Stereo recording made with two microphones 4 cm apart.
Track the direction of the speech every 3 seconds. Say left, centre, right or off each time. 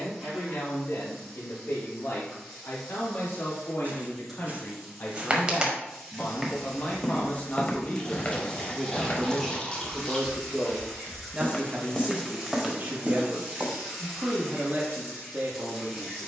left, left, left, centre, right, right.